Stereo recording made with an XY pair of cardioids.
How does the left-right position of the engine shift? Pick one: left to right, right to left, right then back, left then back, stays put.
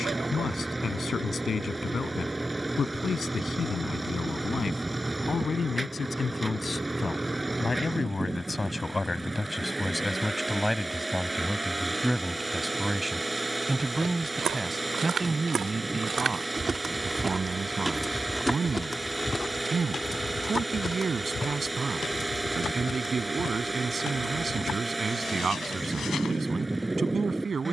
stays put.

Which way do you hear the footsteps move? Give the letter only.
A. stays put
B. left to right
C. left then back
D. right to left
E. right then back
D.